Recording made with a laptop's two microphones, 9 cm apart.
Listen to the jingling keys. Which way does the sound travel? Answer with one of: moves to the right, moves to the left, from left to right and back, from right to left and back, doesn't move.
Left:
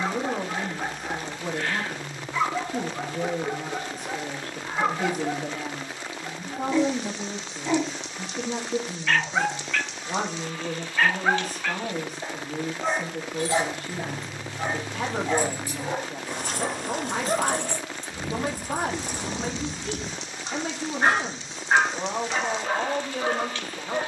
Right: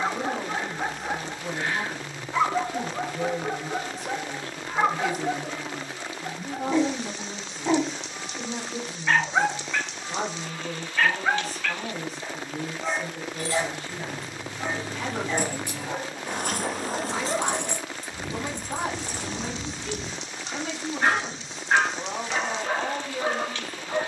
from left to right and back.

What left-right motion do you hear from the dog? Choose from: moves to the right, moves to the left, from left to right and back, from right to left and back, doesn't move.
from right to left and back.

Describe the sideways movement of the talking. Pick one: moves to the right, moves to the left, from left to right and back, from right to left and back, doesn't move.
doesn't move.